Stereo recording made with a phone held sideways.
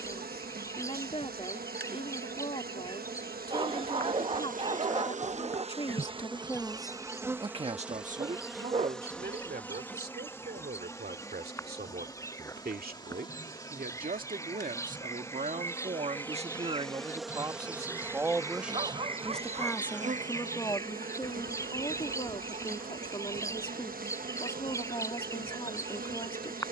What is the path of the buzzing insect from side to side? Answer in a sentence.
You can hear the buzzing insect go left and come back.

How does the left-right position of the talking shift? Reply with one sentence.
In this clip you hear the talking go right and come back.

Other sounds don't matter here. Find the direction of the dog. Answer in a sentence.
In this clip you hear the dog on the right.